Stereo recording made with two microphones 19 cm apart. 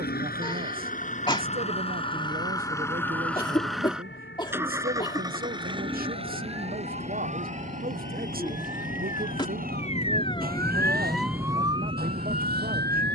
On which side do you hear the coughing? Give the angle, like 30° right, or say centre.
20° left.